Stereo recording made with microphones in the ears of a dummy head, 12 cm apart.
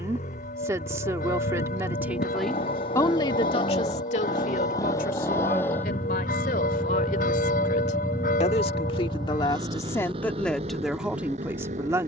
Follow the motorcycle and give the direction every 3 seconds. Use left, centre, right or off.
left, left, centre, right.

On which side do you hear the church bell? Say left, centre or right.
left.